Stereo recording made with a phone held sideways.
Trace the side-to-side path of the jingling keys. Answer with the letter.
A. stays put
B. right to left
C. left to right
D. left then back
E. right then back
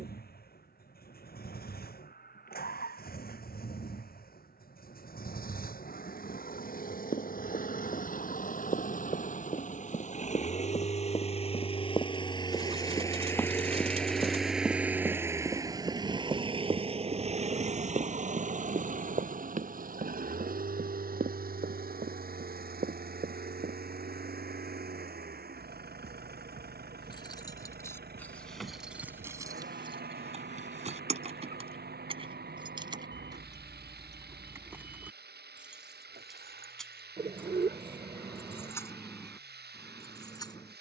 E.